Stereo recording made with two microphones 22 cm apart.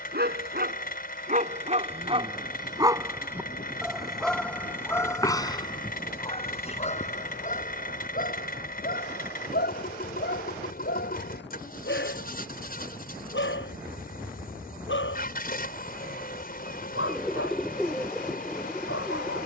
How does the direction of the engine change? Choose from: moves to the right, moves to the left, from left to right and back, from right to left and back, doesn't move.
doesn't move.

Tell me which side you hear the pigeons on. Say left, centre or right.
centre.